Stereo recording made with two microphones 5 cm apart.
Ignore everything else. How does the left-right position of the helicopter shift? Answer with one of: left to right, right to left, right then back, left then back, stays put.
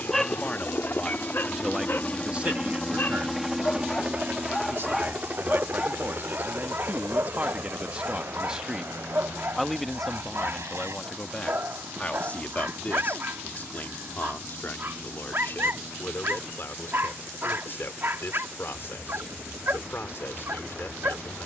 left to right.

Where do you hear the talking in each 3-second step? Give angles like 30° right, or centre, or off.
centre, 60° right, 30° right, 10° left, 40° left, 50° left, 50° left.